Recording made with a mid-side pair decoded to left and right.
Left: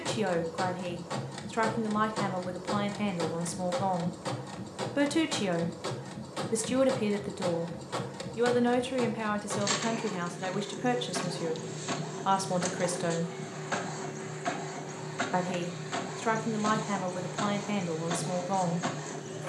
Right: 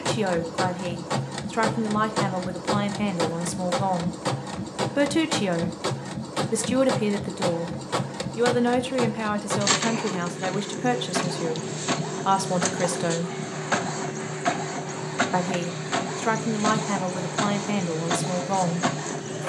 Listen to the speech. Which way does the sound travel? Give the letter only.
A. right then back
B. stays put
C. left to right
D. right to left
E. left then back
B.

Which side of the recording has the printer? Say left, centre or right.
right.